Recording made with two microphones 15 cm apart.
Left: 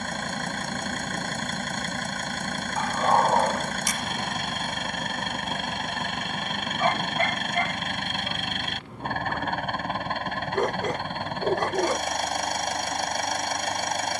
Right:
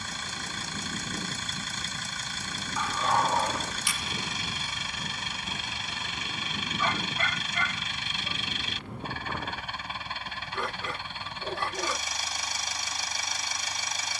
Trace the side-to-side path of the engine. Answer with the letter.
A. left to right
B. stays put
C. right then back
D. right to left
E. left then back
B.